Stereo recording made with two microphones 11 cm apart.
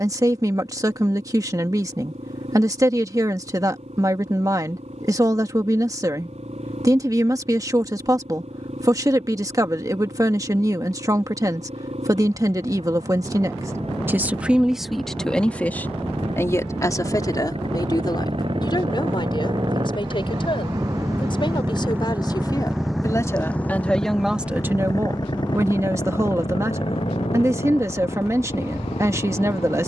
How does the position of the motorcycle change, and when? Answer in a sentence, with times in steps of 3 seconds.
You can hear the motorcycle on the right from 0 s, in the centre from 21 s and on the left from 24 s.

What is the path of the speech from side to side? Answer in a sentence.
You can hear the speech move from right to left and back again.